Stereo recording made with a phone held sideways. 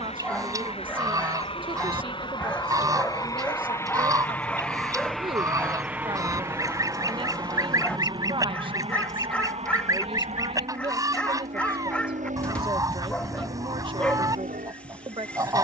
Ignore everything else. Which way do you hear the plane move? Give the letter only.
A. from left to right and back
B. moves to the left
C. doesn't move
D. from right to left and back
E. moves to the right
E.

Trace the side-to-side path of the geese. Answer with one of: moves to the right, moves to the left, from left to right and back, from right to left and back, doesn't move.
doesn't move.